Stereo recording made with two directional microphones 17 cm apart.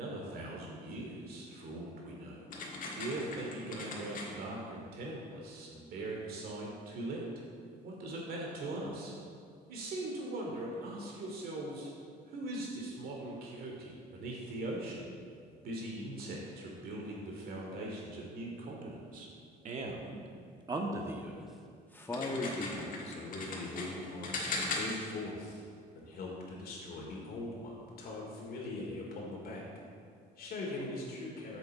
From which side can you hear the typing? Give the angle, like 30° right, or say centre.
50° left.